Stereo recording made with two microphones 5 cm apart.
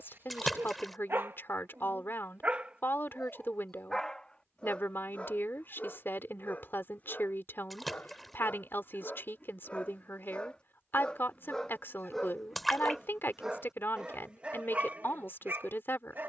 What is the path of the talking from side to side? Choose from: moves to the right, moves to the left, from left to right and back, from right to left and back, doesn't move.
doesn't move.